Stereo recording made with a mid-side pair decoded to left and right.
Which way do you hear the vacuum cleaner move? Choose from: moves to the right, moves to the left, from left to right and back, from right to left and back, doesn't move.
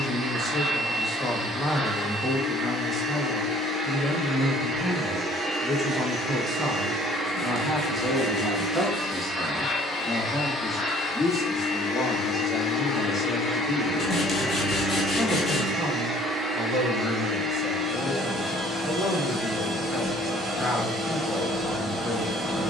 from right to left and back.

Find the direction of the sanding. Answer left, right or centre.
left.